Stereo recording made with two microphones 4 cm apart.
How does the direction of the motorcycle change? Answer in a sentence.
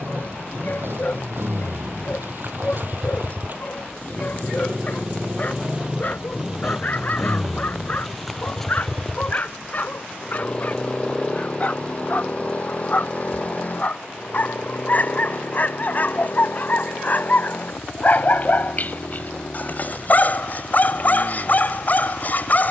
You can hear the motorcycle move from right to left.